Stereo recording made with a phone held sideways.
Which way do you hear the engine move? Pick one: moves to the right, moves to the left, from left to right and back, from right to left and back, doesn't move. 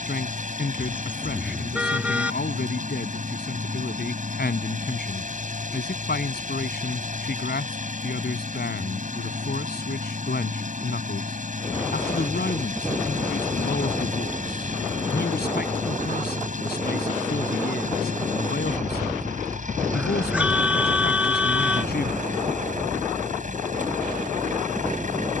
doesn't move.